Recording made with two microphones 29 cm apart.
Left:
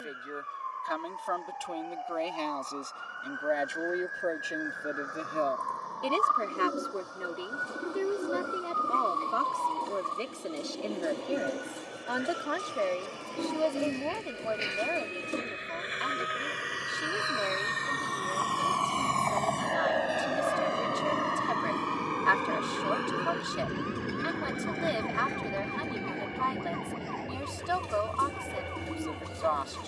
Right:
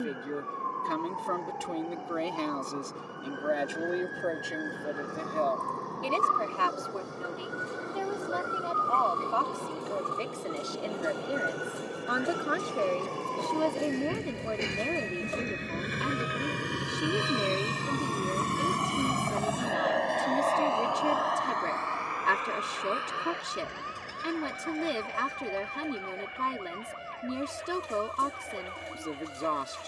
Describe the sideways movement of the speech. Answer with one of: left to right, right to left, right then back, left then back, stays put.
left then back.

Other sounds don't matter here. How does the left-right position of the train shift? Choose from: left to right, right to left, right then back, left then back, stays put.
right to left.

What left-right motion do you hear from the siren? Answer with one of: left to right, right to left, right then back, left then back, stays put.
right to left.